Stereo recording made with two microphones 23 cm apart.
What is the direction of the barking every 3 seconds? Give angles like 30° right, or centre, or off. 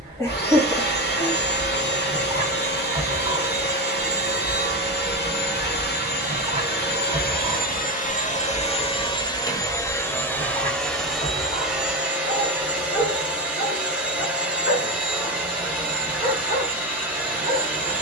20° right, 20° right, 10° right, 20° left, 50° left, 60° left.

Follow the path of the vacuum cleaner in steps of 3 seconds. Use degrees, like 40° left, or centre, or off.
50° left, 50° left, 40° left, 10° left, 10° right, 10° right.